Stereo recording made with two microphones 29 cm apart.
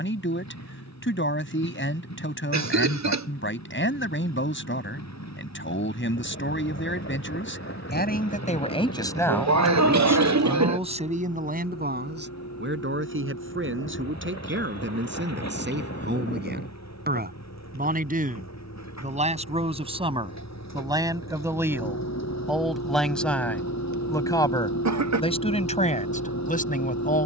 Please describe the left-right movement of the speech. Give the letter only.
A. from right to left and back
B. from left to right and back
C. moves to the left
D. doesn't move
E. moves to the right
B.